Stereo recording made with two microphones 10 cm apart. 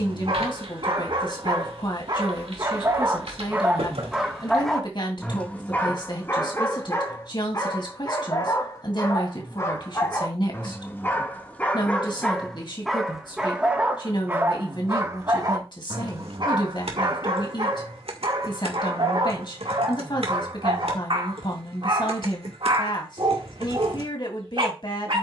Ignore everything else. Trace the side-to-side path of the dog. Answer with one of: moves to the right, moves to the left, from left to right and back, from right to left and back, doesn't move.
from right to left and back.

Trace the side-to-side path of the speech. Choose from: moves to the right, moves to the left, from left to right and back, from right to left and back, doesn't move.
doesn't move.